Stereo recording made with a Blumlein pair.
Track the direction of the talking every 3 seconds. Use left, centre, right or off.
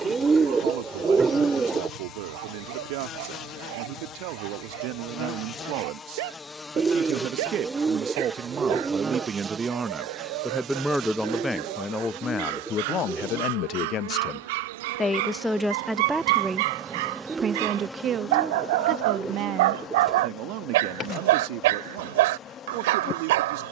right, right, right, centre, left, centre, right, right.